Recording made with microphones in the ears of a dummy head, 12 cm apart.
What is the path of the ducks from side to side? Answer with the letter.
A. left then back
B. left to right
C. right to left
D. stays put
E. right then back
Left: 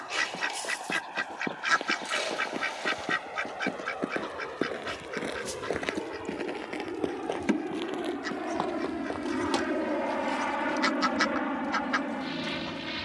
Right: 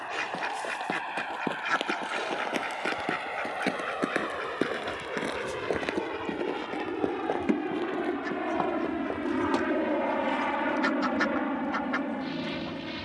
D.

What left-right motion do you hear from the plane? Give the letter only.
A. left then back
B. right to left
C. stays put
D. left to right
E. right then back
B.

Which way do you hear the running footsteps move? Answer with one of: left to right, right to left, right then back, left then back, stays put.
right to left.